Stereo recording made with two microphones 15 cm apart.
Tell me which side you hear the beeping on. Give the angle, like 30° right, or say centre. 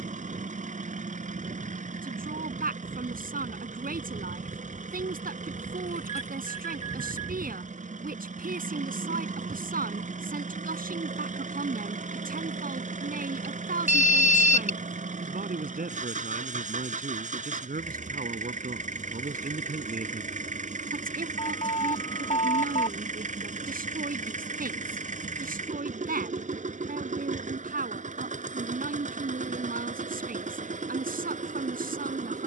50° left.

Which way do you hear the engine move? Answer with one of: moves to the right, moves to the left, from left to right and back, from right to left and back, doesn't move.
doesn't move.